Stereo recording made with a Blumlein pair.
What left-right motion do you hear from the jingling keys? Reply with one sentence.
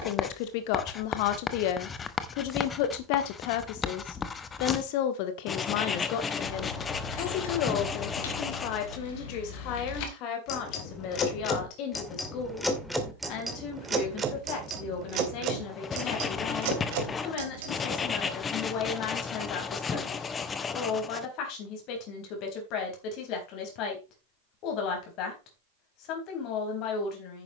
You can hear the jingling keys move from left to right.